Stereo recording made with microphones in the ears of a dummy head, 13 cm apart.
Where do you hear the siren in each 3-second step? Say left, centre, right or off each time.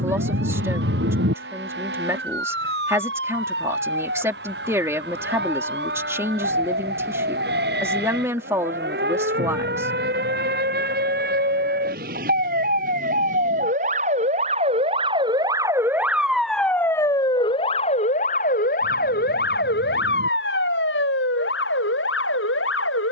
right, right, right, right, right, centre, left, left.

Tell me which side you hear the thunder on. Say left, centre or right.
right.